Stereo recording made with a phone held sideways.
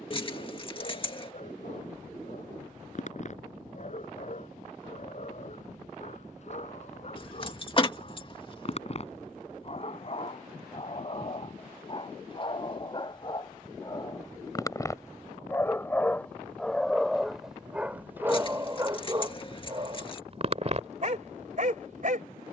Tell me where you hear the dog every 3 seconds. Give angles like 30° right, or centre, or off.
50° left, 50° left, 50° left, 40° left, 30° left, centre, 30° right, 60° right.